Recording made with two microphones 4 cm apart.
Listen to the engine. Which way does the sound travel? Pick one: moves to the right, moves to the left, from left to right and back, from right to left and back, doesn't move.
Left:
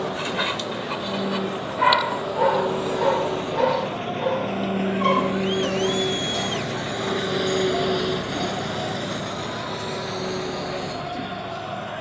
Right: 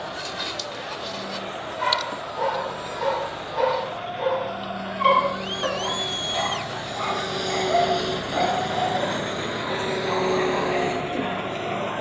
moves to the right.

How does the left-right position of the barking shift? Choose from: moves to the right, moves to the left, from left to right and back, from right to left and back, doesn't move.
moves to the right.